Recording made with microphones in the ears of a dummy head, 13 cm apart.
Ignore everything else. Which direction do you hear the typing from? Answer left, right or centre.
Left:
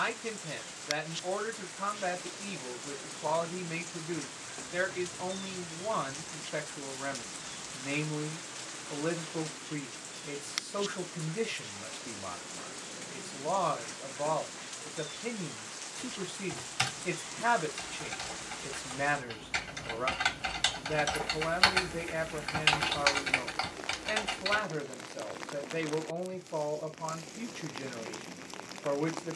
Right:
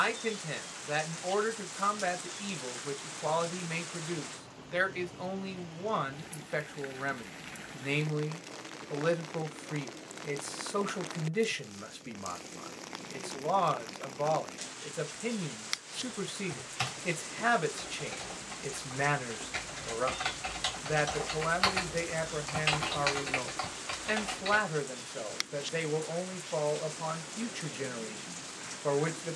left.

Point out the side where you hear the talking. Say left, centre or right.
right.